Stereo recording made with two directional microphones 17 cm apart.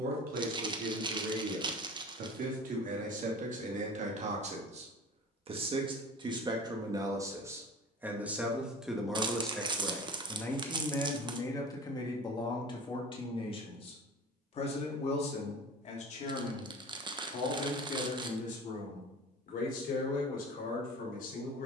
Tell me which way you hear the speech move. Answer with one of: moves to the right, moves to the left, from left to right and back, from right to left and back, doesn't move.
moves to the left.